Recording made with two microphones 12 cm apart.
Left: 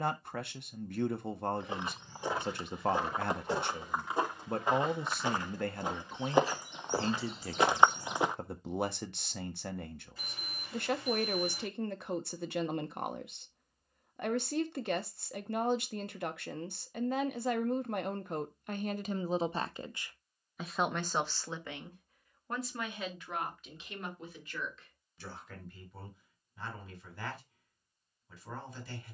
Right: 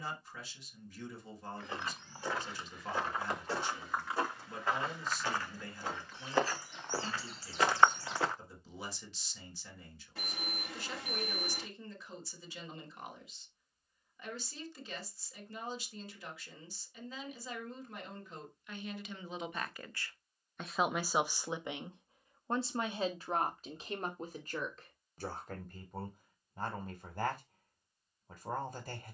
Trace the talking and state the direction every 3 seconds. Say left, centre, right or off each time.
left, left, left, left, left, left, left, right, right, right.